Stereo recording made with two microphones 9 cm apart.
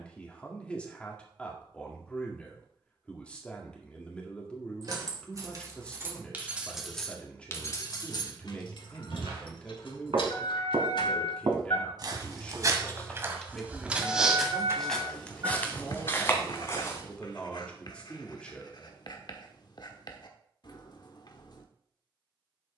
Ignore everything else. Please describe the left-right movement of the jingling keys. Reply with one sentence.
You can hear the jingling keys move from right to left and back again.